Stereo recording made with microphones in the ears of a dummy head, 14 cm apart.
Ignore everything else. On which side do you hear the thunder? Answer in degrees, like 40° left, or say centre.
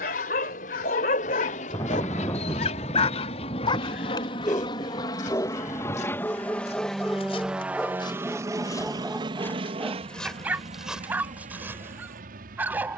20° left.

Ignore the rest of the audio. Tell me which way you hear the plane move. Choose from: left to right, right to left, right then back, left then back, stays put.
left to right.